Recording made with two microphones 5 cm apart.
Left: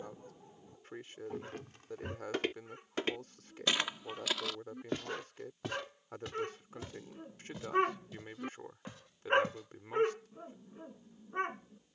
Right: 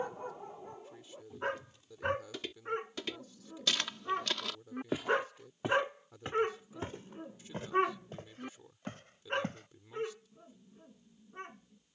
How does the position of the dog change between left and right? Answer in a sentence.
In this clip you hear the dog move from right to left.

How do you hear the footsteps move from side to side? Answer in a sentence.
You can hear the footsteps travel towards the right.